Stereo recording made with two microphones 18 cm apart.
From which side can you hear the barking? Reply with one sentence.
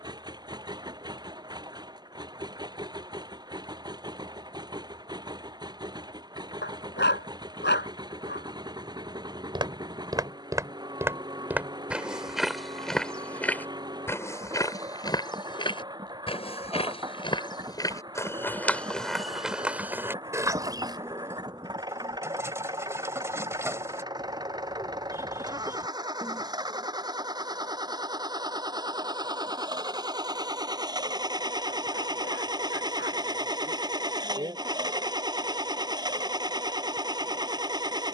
You can hear the barking on the left.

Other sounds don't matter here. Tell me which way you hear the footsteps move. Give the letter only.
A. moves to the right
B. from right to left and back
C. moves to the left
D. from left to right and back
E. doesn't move
B.